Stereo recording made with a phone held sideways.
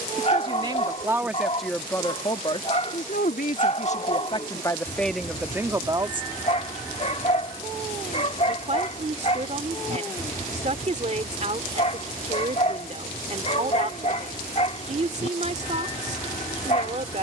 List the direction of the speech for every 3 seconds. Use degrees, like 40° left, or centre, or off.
centre, 20° left, 40° right, 50° right, 50° right, 50° right.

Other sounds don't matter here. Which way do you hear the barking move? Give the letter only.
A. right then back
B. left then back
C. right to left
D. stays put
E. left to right
D.